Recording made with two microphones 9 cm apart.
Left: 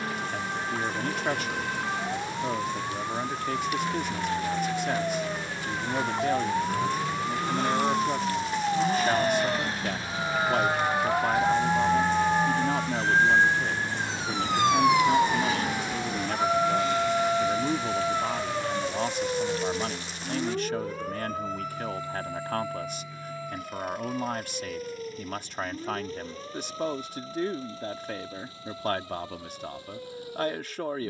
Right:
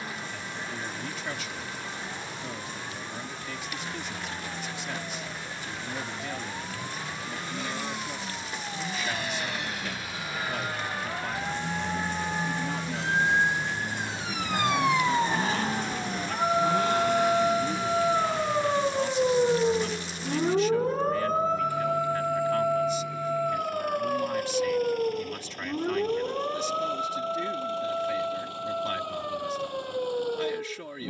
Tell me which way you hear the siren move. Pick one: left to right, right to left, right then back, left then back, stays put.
left to right.